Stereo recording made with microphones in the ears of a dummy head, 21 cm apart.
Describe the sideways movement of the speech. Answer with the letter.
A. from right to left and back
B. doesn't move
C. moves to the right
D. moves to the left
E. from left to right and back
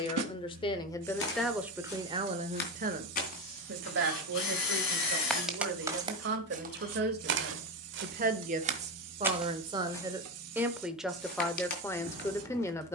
E.